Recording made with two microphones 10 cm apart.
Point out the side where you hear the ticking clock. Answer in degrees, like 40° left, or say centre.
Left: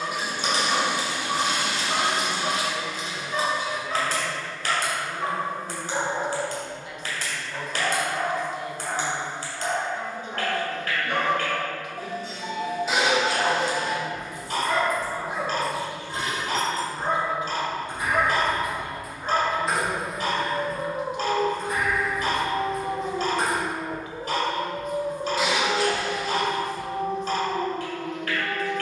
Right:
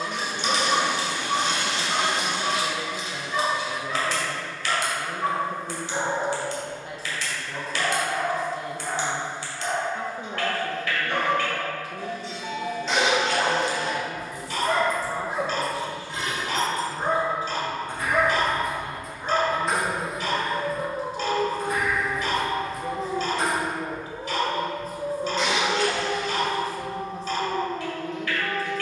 40° left.